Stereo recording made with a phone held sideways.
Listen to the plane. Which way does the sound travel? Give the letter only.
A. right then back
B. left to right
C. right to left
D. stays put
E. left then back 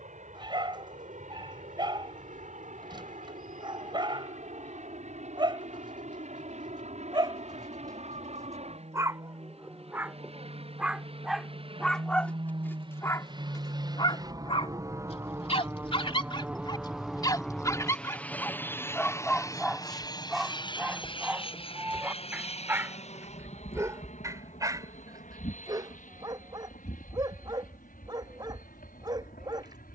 C.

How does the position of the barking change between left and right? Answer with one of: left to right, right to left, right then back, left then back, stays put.
left then back.